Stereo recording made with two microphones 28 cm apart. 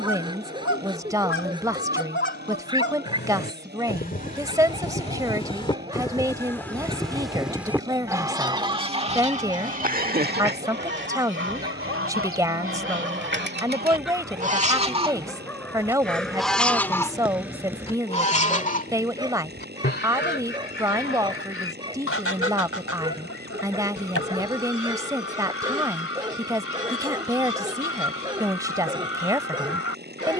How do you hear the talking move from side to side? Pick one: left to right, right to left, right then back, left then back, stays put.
stays put.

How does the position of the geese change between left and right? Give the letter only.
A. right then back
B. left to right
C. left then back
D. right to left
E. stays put
A.